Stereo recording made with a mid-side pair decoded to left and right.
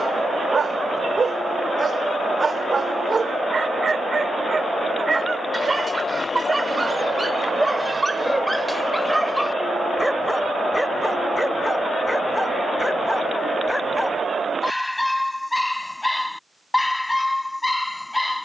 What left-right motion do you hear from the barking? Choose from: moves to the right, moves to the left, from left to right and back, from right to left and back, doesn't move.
moves to the left.